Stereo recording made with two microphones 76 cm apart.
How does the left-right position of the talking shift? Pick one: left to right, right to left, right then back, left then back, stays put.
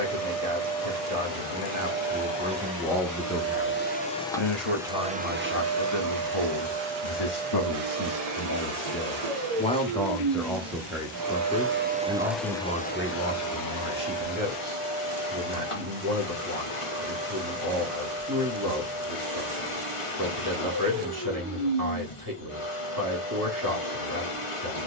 left then back.